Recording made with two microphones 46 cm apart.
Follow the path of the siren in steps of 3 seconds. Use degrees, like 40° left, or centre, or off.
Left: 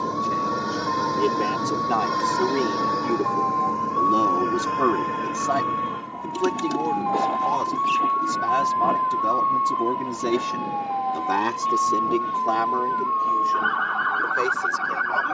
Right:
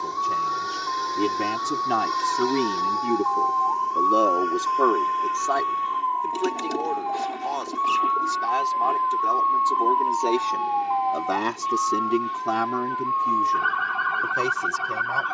50° left, 40° left, 20° left, 10° right, 40° right.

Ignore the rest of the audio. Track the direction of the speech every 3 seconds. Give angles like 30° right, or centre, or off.
30° right, 30° left, 70° left, 30° left, 40° right.